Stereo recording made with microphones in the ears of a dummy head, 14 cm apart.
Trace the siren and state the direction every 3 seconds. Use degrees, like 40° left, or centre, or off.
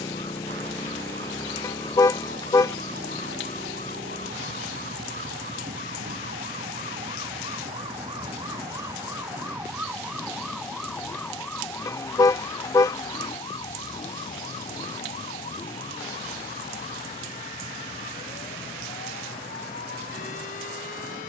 70° right, 50° right, 30° right, centre, 20° left, 40° left, 50° left.